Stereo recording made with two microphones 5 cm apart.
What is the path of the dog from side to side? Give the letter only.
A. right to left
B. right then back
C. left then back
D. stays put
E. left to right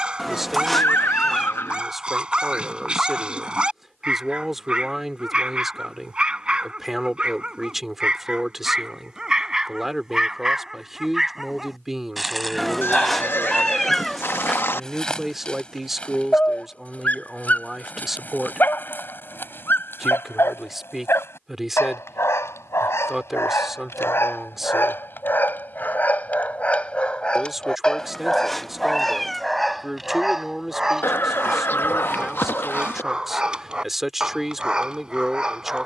C.